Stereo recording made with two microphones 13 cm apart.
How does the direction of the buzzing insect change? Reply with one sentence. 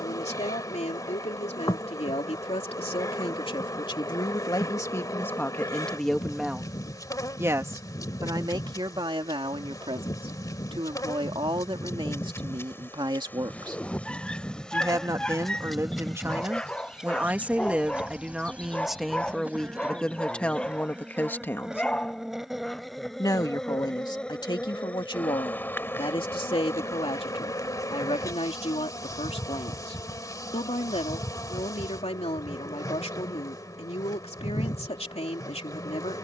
In this clip you hear the buzzing insect go right and come back.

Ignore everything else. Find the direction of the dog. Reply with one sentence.
In this clip you hear the dog in the centre.